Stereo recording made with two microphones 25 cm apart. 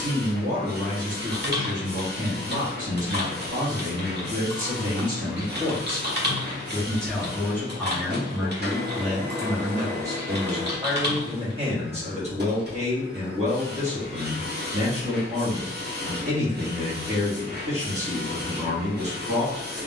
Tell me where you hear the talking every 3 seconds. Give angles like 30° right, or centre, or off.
30° right, 30° right, centre, 10° right, 30° right, 30° right, 30° right.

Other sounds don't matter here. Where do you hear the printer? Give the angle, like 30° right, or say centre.
40° right.